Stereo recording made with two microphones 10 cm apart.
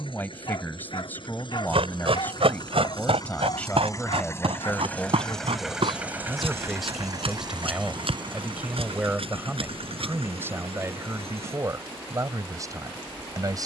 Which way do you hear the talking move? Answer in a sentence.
You can hear the talking travel towards the right.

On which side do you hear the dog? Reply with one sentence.
In this clip you hear the dog on the left.